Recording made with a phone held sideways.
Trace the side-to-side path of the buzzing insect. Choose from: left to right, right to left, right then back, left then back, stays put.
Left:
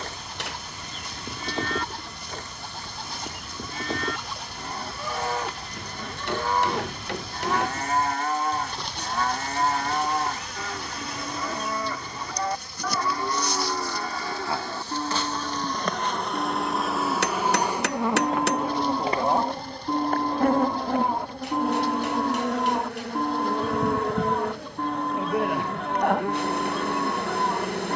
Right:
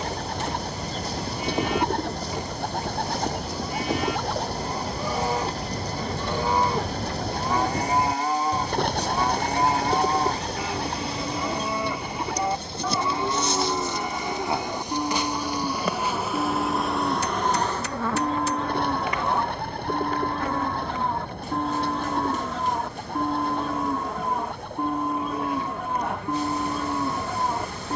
right to left.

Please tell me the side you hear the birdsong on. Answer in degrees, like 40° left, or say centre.
60° right.